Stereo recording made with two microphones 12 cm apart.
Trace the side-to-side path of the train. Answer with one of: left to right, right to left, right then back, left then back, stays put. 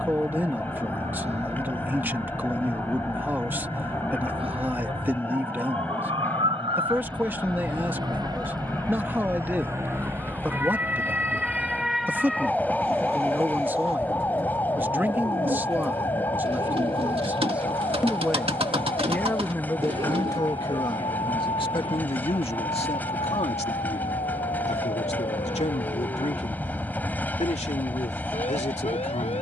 stays put.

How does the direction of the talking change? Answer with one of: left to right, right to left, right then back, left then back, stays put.
right to left.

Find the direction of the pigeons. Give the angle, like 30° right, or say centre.
50° right.